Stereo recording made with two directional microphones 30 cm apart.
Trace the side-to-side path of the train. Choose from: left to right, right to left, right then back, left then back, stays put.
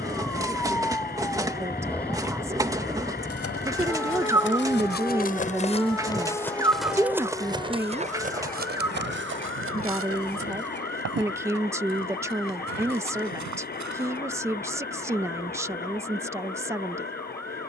stays put.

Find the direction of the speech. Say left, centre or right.
centre.